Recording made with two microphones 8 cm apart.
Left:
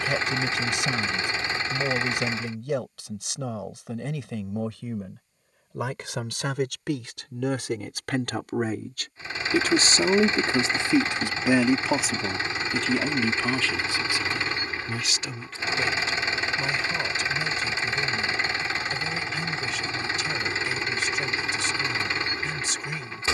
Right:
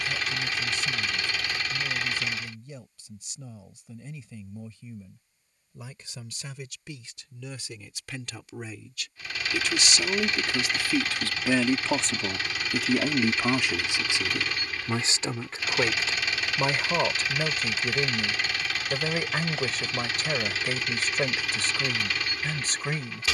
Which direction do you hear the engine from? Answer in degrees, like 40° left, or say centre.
30° left.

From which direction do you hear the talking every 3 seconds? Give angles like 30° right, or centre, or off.
80° left, 80° left, 60° left, 30° left, 10° right, 40° right, 50° right, 50° right.